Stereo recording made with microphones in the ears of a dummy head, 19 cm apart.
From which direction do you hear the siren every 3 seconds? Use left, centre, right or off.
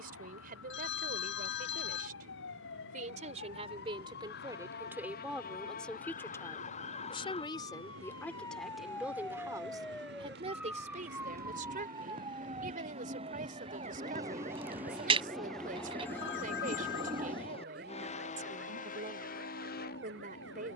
left, left, left, centre, right, right, right.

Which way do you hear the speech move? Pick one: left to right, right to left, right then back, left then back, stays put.
left then back.